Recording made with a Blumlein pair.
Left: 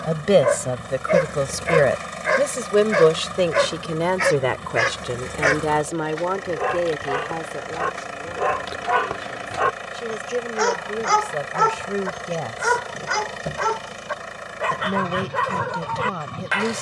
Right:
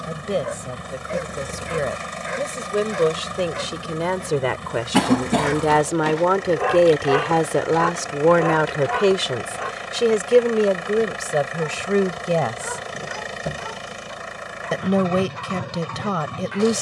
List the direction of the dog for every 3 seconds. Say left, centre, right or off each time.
left, left, centre, left, left, left.